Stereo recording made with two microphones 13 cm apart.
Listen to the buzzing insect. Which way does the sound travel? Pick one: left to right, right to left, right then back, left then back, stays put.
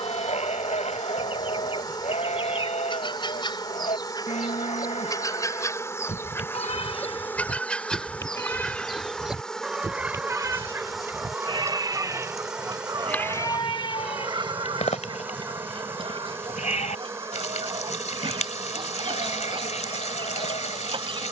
left to right.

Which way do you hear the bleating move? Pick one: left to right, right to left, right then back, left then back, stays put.
right then back.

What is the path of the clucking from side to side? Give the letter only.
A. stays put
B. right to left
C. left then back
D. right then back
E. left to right
E.